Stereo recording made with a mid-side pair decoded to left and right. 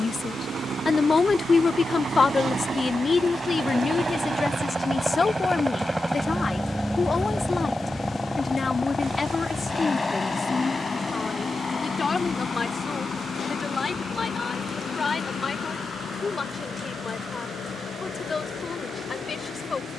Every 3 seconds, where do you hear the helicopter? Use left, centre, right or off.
right, right, centre, left, left, left, left.